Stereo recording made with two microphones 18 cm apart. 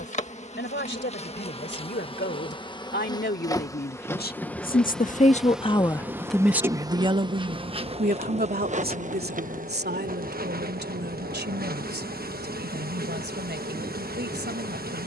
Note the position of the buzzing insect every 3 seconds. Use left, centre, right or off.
left, centre, right, right, right.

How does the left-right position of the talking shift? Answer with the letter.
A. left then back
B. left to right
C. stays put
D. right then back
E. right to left
B.